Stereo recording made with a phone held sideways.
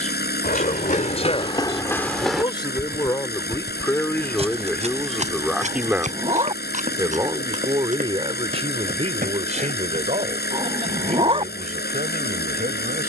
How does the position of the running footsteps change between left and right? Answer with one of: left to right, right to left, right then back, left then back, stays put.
left to right.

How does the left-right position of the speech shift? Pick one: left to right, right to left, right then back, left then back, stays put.
left to right.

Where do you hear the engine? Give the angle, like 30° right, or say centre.
80° left.